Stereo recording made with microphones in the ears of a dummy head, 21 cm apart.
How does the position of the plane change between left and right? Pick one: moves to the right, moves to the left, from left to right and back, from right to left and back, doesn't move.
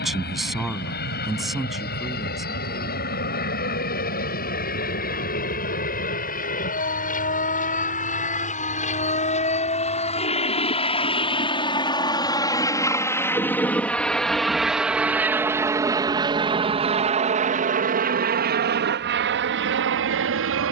moves to the right.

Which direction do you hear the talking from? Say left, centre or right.
centre.